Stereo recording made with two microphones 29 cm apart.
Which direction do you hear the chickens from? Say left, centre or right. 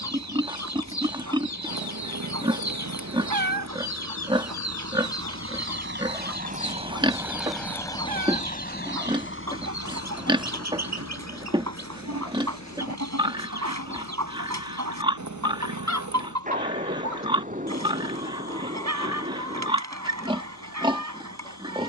right.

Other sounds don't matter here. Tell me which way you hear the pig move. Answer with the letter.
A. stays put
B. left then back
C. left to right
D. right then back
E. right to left
A.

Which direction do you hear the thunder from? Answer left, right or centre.
right.